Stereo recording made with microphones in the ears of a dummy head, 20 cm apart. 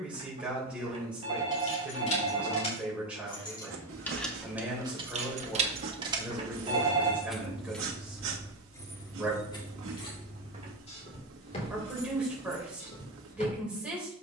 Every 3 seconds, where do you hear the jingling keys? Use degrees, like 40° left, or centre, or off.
30° left, 10° right, centre, 30° left, 40° left.